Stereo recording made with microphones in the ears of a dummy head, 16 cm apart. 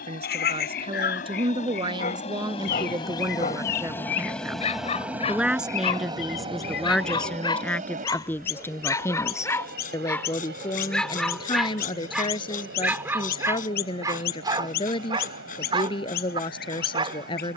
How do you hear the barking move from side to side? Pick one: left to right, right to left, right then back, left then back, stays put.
left to right.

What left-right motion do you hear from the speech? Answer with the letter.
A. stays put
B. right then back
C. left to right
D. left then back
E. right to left
E.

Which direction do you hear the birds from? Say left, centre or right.
left.